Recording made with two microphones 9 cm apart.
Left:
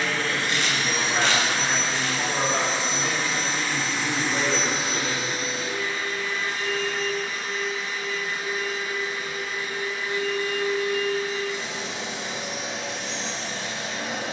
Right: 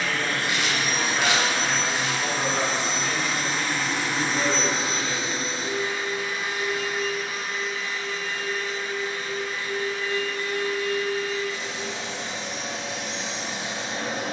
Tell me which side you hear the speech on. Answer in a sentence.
You can hear the speech on the left.